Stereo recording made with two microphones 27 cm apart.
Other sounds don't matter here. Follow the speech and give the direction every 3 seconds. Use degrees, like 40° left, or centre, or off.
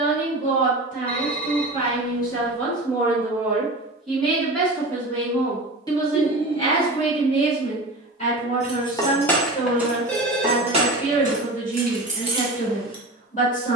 20° left, centre, 30° left, 30° left, 30° left.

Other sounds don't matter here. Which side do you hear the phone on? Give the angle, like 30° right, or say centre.
10° left.